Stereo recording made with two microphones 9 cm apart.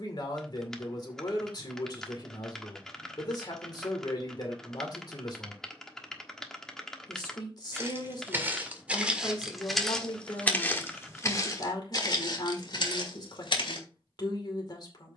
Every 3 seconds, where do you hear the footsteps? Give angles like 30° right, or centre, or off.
off, off, 20° right, 20° left, 60° left.